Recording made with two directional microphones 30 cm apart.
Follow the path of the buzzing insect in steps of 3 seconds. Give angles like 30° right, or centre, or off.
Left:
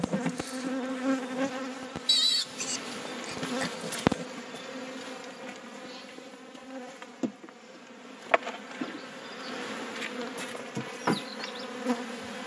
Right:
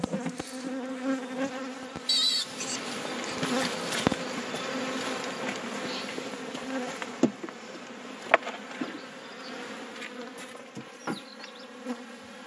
10° left, 30° right, 40° right, 30° left.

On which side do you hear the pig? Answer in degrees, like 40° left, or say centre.
10° left.